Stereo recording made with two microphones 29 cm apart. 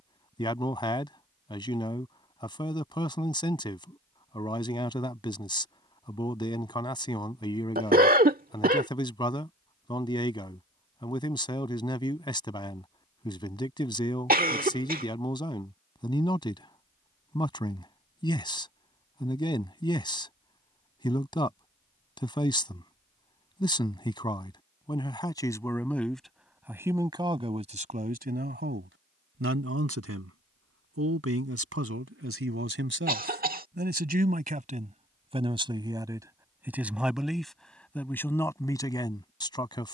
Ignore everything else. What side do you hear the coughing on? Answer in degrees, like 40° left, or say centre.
30° right.